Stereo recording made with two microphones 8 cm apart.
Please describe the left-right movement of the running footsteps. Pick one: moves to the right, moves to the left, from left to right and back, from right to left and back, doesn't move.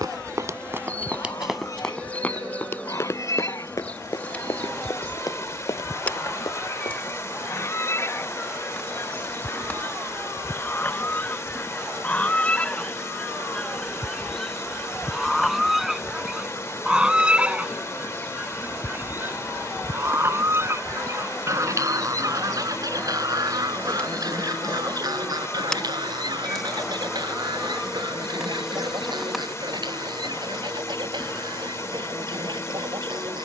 moves to the left.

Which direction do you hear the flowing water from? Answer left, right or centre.
left.